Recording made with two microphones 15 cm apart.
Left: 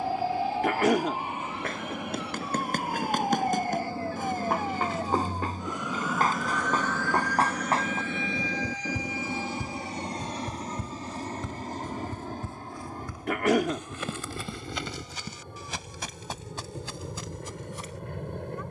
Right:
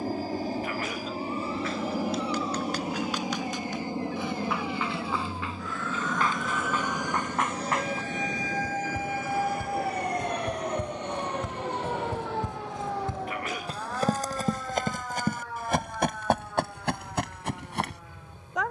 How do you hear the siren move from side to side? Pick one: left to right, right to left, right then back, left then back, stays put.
left to right.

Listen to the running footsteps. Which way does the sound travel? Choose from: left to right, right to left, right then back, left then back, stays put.
left to right.